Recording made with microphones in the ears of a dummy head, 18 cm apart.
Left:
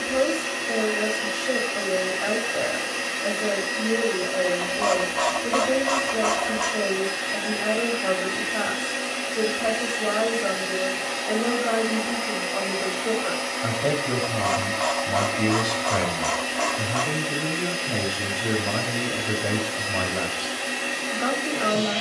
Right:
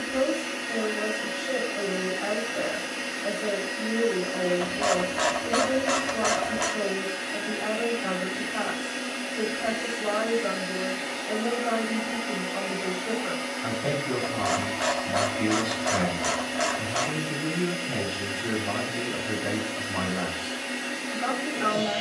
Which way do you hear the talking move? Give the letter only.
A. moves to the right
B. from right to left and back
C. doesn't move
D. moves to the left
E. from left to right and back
C.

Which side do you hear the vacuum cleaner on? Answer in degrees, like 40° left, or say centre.
70° left.